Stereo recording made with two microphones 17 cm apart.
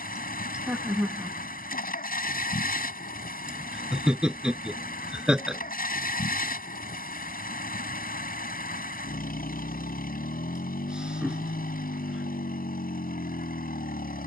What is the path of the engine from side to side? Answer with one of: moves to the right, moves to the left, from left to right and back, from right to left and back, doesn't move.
doesn't move.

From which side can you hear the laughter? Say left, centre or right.
centre.